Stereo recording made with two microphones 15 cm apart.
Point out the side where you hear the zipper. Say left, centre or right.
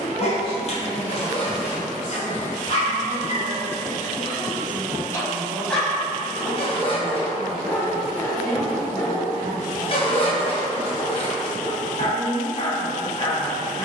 left.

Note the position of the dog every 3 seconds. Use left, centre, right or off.
left, left, centre, left, left.